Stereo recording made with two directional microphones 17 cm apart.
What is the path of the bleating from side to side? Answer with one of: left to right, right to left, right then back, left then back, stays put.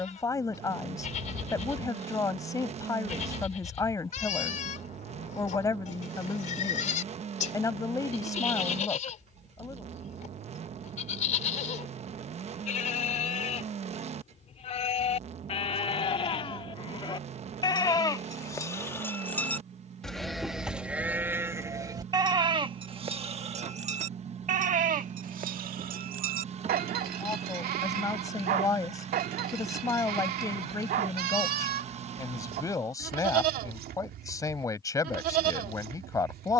left to right.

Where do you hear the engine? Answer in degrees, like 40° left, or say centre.
40° right.